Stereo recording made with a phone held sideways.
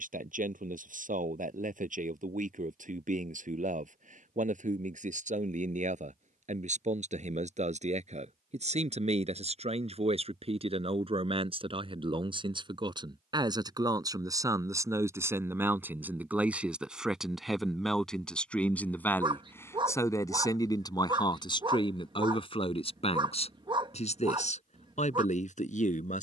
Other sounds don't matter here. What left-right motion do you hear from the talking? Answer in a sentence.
In this clip you hear the talking move to the left.